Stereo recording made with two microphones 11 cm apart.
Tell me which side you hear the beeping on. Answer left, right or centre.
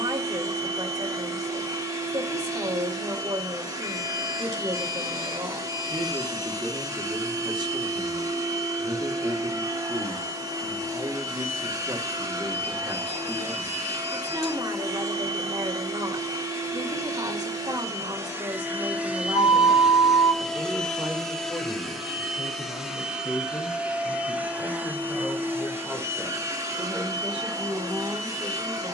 left.